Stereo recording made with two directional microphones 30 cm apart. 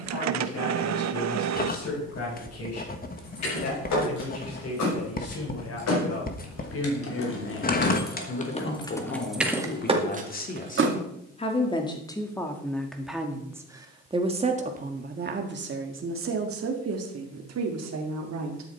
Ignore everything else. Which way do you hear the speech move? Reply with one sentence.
You can hear the speech travel towards the right.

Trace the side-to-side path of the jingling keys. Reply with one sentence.
You can hear the jingling keys travel towards the right.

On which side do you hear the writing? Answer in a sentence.
You can hear the writing on the left.